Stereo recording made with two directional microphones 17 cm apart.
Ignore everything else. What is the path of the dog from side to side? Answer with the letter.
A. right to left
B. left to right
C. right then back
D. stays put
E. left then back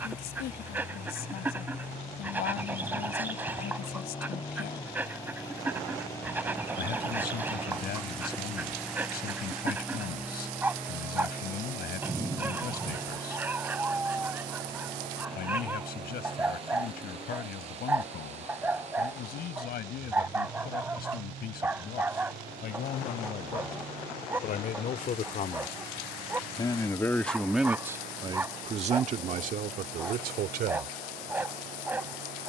D.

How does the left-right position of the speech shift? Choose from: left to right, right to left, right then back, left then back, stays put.
left to right.